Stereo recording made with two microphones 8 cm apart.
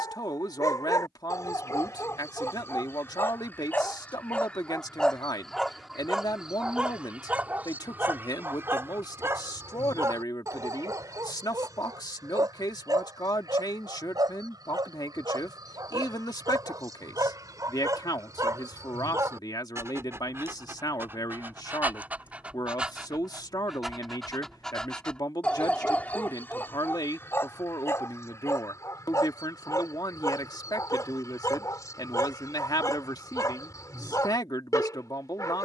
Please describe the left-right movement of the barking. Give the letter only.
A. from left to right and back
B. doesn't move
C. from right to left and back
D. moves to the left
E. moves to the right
A.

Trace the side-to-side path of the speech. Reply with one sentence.
You can hear the speech stay put.